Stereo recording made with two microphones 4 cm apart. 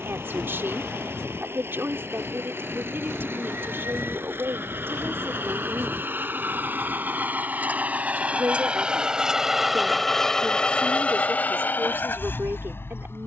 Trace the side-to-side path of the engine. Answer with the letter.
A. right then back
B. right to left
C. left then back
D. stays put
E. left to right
B.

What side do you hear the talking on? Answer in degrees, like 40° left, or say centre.
60° right.